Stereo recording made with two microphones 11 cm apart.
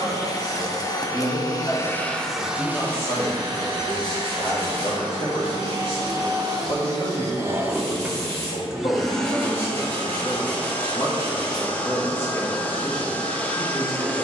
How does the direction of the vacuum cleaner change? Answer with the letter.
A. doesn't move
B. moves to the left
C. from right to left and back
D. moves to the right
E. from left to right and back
E.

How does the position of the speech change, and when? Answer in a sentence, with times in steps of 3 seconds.
In this clip you hear the speech in the centre from 0 s, on the left from 3 s and in the centre from 12 s.